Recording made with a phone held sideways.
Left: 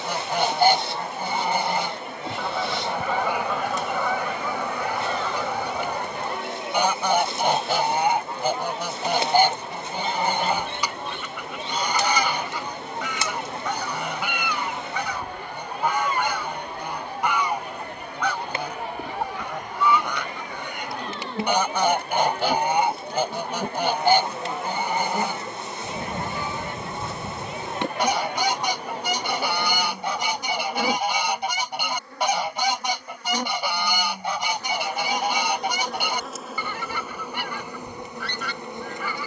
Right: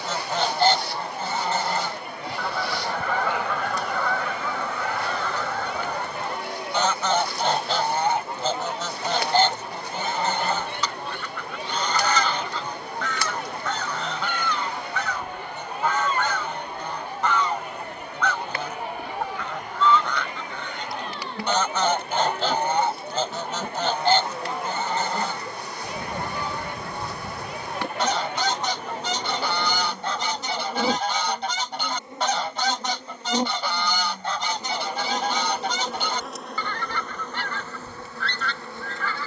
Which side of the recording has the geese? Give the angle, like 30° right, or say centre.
10° left.